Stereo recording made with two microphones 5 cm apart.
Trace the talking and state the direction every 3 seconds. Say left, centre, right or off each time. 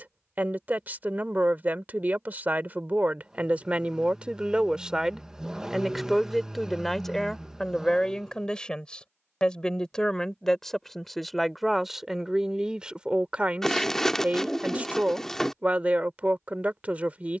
right, right, centre, centre, right, right.